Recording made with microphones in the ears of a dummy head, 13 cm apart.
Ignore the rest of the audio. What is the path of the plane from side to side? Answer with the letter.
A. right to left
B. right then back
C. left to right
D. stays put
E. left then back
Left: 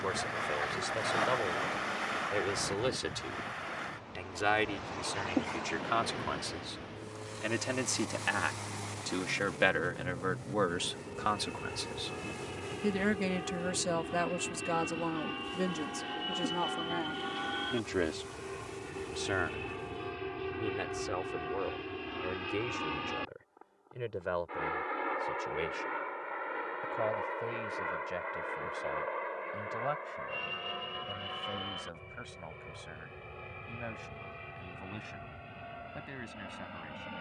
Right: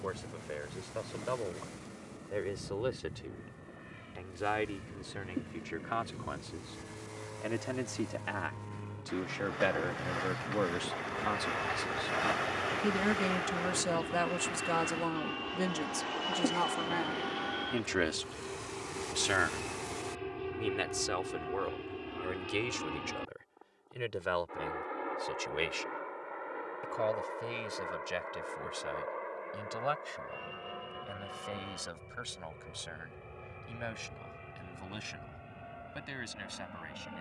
A.